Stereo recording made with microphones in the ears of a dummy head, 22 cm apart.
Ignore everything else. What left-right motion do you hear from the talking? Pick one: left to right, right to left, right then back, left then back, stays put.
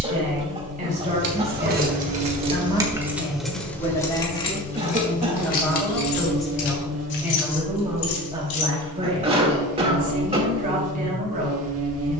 left then back.